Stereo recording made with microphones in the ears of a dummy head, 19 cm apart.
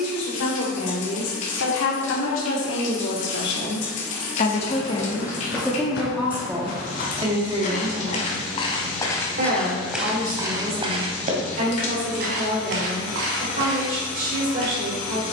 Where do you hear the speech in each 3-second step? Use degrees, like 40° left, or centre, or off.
70° left, 30° left, 20° right, 40° right, 40° right.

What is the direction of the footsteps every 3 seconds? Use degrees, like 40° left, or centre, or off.
off, 60° left, 40° left, 10° right, 60° right.